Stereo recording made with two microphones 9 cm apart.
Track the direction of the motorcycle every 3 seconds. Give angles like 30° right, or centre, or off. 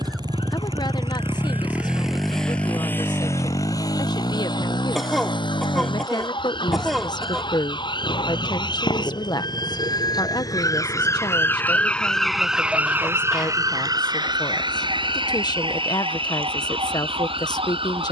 20° right, 50° left, 70° left, 80° left, 80° left, 80° left.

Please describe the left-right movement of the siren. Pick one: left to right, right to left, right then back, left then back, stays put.
left to right.